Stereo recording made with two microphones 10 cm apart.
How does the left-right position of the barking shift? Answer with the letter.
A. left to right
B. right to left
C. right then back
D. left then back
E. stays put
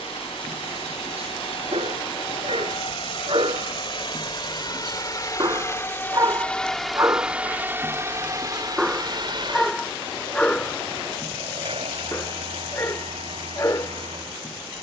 B.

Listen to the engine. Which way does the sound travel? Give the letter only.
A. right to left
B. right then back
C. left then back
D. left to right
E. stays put
D.